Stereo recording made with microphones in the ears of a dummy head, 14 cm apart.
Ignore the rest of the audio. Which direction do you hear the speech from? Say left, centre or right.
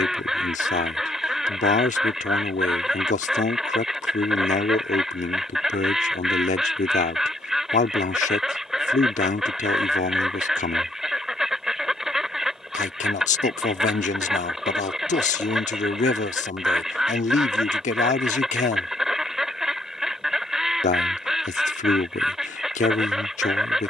left.